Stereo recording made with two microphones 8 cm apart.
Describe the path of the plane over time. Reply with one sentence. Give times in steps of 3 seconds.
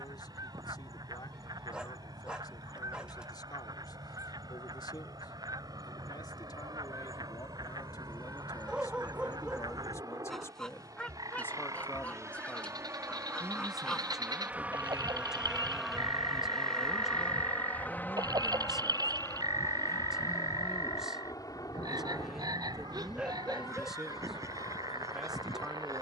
In this clip you hear the plane on the right from 0 s, in the centre from 15 s and on the left from 18 s.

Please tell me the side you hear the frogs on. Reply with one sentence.
In this clip you hear the frogs on the right.